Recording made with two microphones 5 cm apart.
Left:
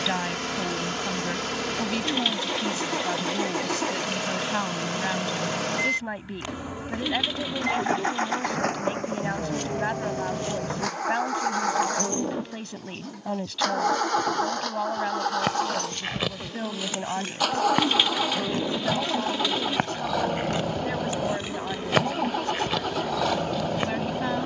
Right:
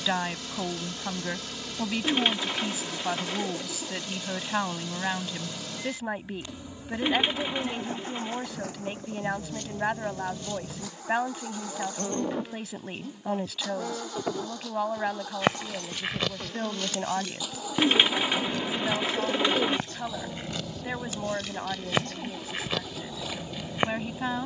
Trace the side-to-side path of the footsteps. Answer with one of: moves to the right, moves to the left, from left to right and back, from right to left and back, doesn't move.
from right to left and back.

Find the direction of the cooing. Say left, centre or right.
right.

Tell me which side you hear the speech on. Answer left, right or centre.
centre.